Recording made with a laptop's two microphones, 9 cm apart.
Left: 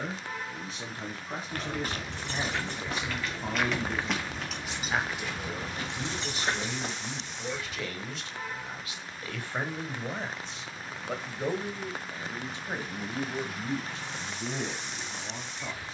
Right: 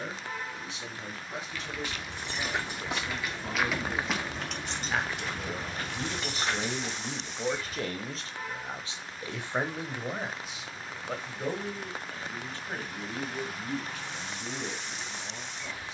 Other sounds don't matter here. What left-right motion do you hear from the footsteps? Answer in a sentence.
In this clip you hear the footsteps travel towards the right.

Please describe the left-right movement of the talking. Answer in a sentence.
In this clip you hear the talking move from left to right and back again.